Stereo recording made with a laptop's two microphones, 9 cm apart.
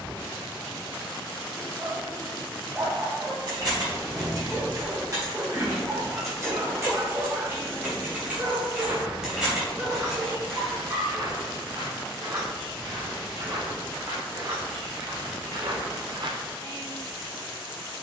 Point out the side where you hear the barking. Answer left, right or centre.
right.